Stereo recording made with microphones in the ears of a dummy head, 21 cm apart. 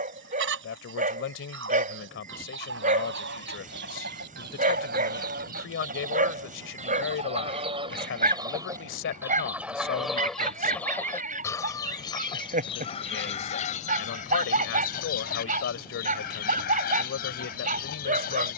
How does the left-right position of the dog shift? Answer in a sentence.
You can hear the dog stay in one place.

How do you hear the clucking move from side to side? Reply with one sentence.
In this clip you hear the clucking move to the left.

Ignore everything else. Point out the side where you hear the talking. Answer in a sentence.
You can hear the talking on the left.